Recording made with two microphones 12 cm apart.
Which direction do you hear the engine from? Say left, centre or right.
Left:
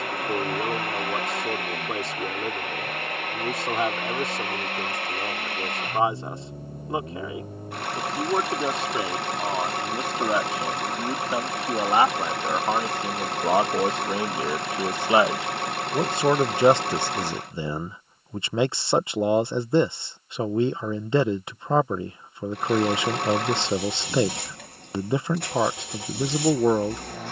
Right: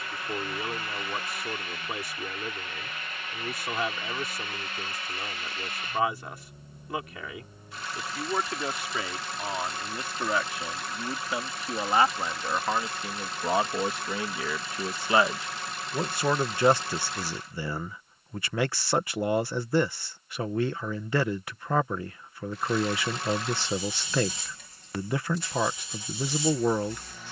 left.